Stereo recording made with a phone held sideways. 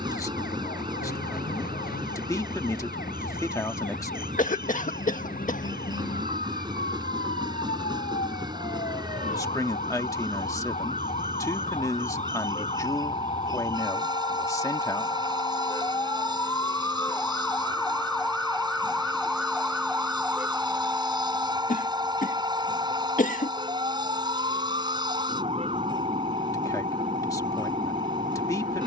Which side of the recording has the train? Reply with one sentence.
In this clip you hear the train on the right.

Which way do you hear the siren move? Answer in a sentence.
You can hear the siren move to the right.